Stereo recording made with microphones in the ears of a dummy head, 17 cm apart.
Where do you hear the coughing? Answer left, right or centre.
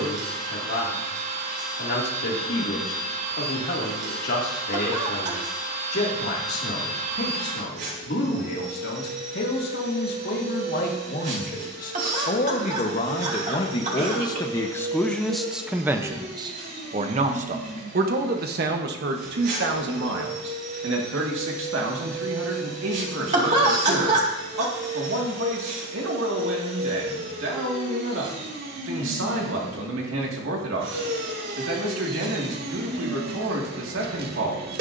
right.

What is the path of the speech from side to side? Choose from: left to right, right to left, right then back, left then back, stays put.
left to right.